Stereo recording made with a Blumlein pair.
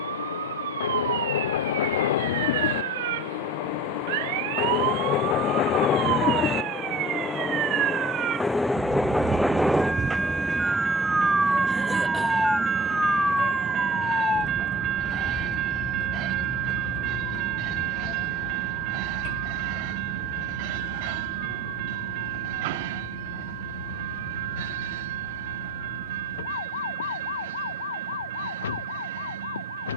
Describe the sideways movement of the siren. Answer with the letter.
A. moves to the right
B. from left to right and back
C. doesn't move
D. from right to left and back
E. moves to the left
E.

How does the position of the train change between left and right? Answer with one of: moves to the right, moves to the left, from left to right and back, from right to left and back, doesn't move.
moves to the right.